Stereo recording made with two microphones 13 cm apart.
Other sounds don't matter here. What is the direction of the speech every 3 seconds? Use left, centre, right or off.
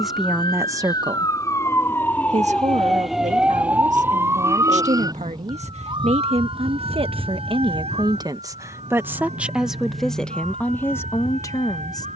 right, right, right, centre.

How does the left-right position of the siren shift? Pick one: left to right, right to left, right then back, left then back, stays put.
left to right.